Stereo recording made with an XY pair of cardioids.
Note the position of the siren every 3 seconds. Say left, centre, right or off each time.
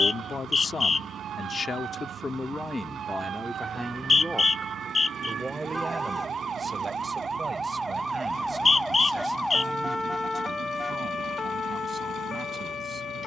right, right, right, left, left.